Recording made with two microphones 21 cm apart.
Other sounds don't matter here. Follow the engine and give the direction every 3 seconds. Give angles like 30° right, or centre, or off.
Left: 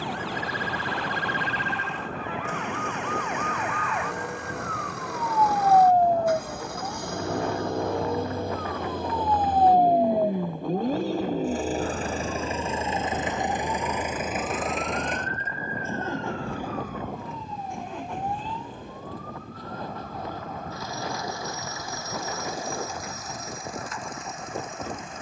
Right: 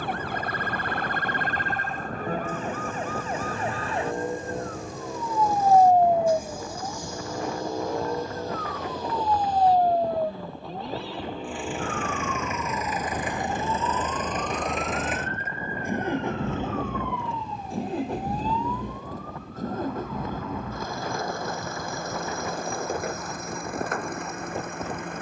80° left, 80° left, 70° left, 50° left, 20° left, 20° right, 40° right, 60° right, 60° right.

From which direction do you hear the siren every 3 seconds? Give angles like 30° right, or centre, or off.
50° right, 30° right, centre, 20° left, 30° left, 40° left, 40° left, 50° left, 50° left.